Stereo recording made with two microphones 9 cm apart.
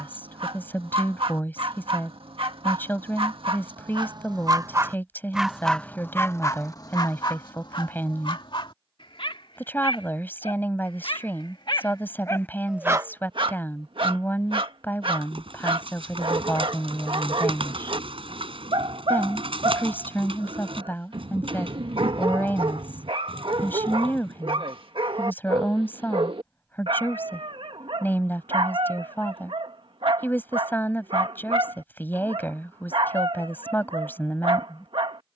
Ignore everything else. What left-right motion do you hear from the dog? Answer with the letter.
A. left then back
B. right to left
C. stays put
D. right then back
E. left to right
A.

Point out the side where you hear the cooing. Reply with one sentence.
You can hear the cooing on the right.